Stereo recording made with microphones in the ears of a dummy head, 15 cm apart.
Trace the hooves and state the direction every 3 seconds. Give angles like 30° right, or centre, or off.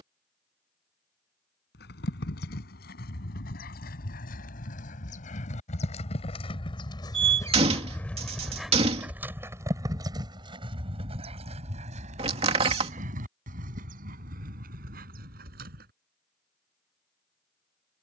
70° left, 50° left, 20° left, 30° right, 50° right, 60° right.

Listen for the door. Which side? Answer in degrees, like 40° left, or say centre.
30° right.